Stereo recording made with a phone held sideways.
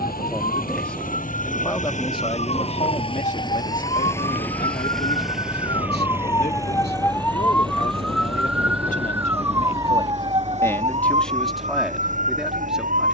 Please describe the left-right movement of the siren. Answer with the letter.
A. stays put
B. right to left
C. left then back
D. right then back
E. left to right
E.